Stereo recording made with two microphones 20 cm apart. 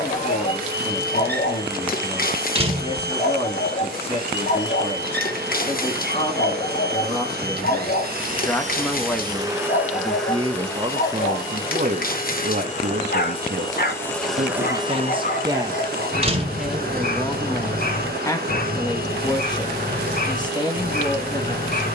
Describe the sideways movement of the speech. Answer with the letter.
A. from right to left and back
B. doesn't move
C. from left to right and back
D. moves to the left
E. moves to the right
C.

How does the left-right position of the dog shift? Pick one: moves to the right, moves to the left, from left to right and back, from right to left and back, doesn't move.
doesn't move.